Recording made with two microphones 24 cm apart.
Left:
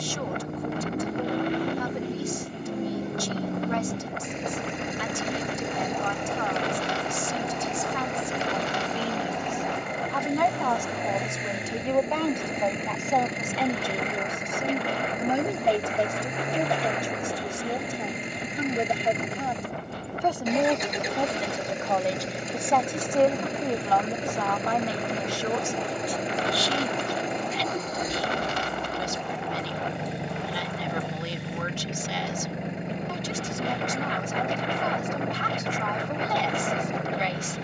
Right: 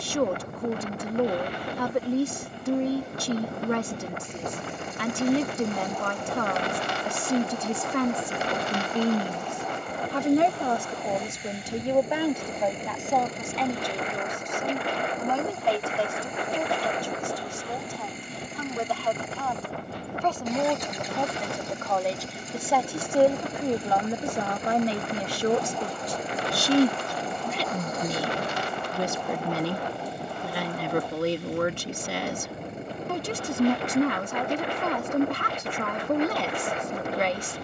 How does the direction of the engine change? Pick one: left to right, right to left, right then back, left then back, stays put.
stays put.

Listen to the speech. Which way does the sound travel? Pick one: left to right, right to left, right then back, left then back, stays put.
left then back.